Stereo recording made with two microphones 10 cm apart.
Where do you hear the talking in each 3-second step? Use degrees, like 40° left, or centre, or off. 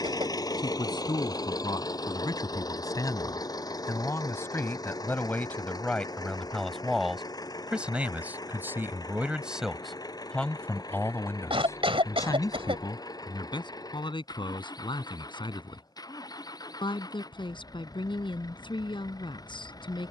40° left, 20° left, 10° right, 10° left, 50° left, 50° left, 50° left.